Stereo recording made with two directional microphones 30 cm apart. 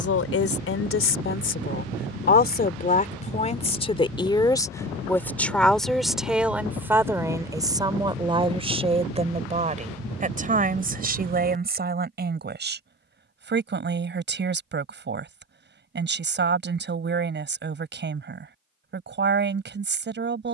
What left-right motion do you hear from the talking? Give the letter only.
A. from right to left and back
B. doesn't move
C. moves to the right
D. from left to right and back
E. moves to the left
C.